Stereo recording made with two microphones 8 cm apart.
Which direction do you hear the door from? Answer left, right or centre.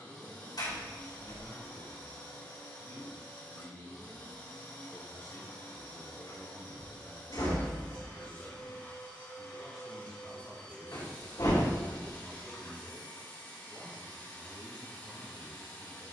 left.